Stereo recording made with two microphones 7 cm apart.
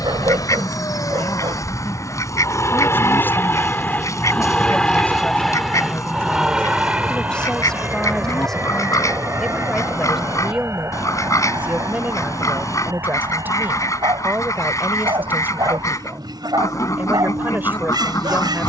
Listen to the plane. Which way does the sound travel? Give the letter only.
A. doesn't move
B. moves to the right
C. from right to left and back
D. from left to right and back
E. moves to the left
B.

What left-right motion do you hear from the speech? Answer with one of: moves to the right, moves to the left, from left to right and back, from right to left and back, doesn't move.
moves to the right.